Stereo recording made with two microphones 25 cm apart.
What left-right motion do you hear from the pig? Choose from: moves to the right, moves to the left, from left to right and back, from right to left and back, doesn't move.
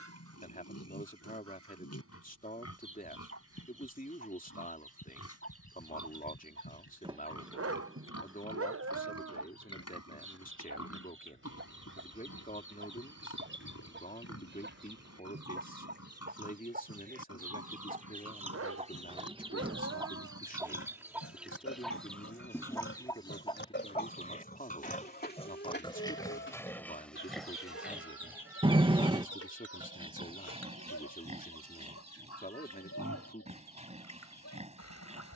moves to the right.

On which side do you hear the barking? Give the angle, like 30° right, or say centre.
60° right.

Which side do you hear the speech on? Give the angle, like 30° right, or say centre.
30° left.